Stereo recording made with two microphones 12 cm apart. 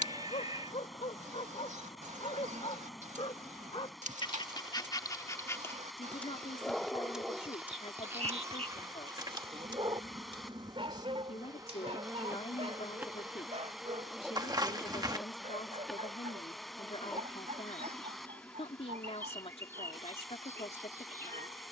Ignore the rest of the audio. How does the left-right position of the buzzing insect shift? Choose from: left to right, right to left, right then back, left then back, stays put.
right to left.